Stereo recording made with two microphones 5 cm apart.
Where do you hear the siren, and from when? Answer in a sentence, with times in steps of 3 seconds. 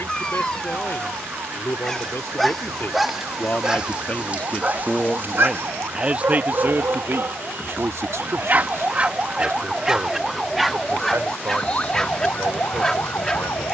You can hear the siren on the right from 0 s, in the centre from 9 s and on the left from 12 s.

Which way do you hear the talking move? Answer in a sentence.
You can hear the talking go from the left side to the right.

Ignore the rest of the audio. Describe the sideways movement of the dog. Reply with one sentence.
In this clip you hear the dog move from left to right and back again.